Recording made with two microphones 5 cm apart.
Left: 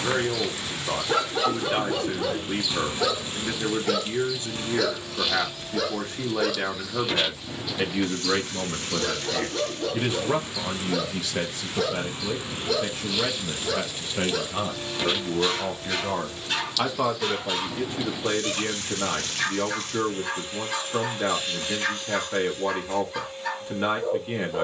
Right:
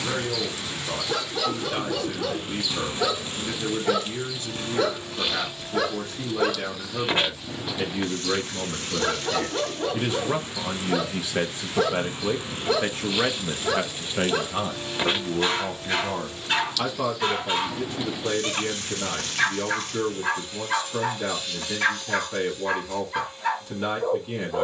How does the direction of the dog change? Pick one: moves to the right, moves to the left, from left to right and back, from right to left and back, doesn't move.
moves to the right.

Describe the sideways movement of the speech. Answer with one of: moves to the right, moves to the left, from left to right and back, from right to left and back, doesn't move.
from left to right and back.